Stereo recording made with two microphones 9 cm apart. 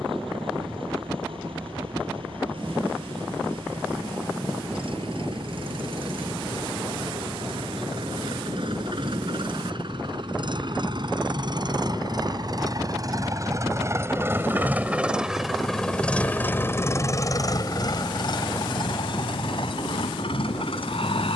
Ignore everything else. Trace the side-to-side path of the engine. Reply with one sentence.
You can hear the engine move to the left.